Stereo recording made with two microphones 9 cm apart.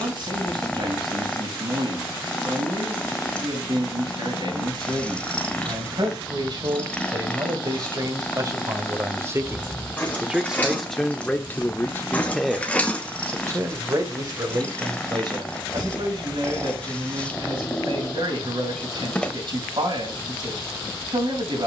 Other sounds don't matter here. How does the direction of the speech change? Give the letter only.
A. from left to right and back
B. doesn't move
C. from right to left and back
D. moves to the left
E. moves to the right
C.